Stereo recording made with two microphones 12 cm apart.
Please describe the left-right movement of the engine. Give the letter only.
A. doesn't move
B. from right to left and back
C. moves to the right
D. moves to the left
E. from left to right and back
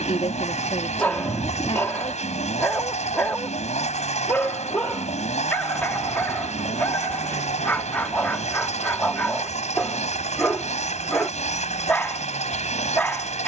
A.